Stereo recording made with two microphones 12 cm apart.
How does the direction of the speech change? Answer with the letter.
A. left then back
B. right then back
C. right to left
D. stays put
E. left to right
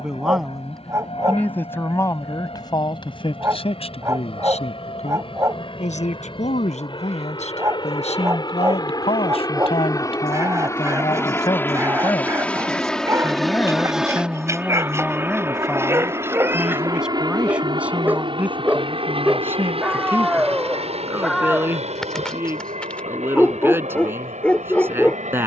A.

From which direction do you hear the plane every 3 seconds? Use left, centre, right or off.
left, left, left, left, centre, right, right, right, right.